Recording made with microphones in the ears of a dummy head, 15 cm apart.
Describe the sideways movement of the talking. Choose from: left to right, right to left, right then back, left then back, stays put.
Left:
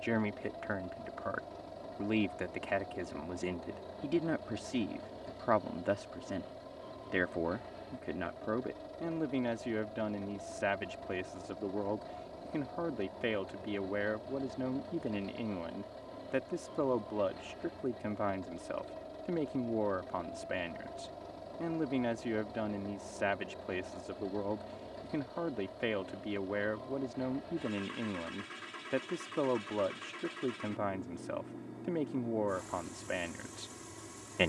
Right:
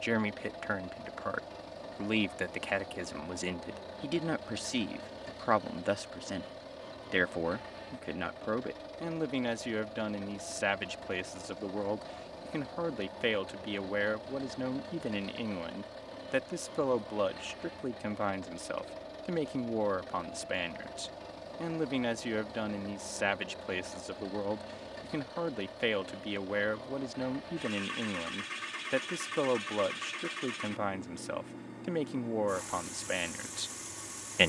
stays put.